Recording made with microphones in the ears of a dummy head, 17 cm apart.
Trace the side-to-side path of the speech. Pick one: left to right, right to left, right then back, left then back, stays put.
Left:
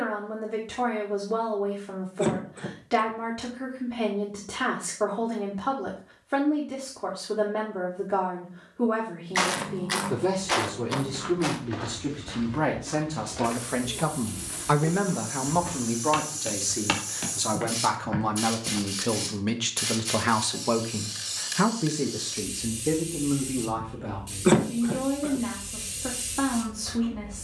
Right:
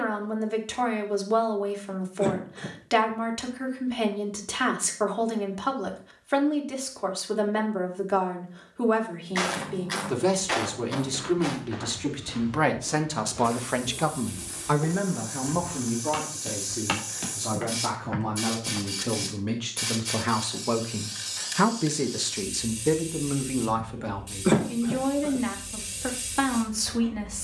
left then back.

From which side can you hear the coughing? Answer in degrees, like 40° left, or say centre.
20° left.